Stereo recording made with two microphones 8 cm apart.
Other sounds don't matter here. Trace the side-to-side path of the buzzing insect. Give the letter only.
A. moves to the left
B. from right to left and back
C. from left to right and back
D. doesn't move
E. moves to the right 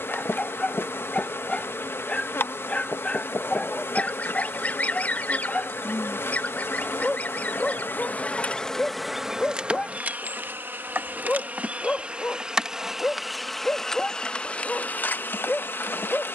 C.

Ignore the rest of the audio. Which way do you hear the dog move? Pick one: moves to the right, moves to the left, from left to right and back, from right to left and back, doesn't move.
doesn't move.